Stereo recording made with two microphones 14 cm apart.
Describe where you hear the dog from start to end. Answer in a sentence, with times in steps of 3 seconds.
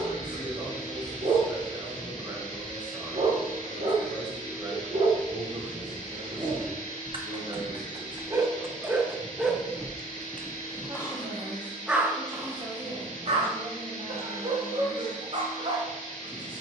In this clip you hear the dog on the right from 0 s, in the centre from 9 s and on the right from 12 s.